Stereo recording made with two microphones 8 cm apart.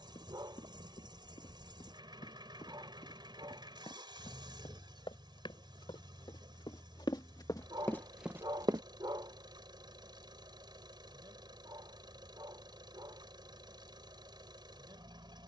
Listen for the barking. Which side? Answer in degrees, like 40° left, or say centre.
60° right.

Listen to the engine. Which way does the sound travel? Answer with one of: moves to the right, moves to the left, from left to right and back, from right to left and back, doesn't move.
doesn't move.